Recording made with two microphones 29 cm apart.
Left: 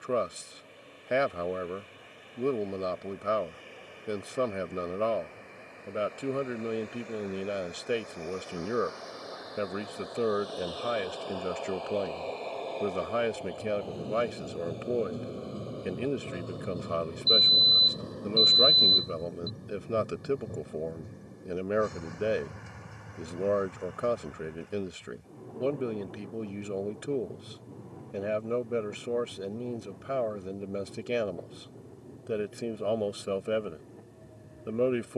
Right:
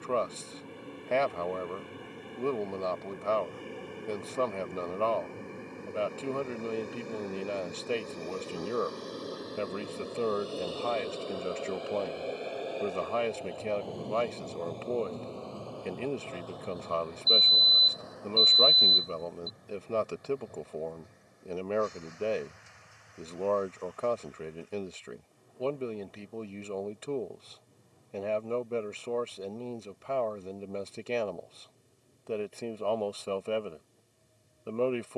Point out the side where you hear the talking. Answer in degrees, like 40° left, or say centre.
10° left.